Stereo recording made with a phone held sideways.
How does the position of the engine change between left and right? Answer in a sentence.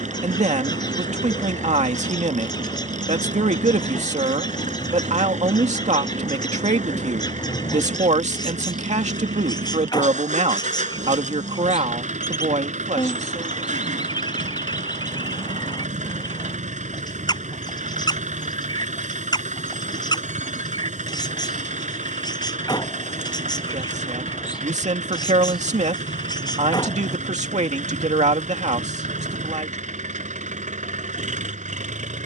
In this clip you hear the engine stay in one place.